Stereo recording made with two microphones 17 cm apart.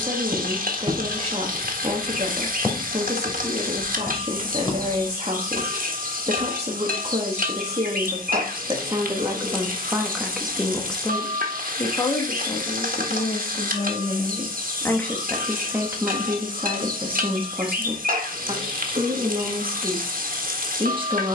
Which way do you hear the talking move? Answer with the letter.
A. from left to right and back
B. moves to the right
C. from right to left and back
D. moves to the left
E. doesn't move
C.